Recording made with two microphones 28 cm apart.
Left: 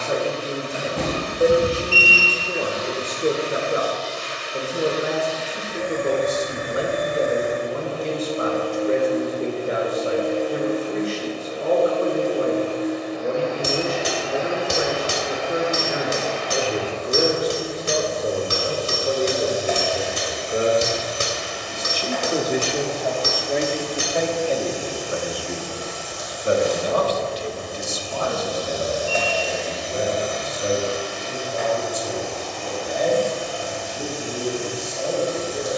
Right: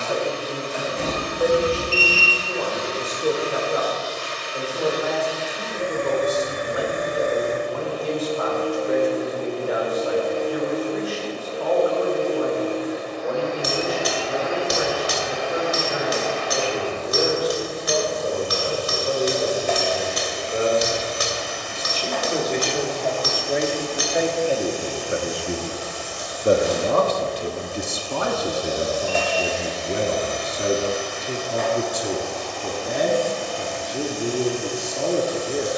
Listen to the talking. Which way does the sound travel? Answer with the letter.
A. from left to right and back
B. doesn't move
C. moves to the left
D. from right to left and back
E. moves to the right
E.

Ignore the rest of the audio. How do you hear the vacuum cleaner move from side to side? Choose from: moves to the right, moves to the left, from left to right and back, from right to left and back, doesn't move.
doesn't move.